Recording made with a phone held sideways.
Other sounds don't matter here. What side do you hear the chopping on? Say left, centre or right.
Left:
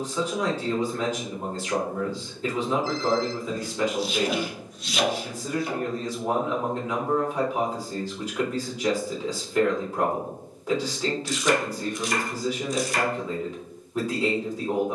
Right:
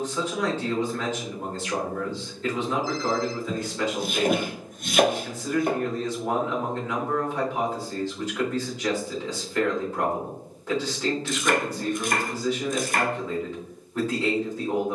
right.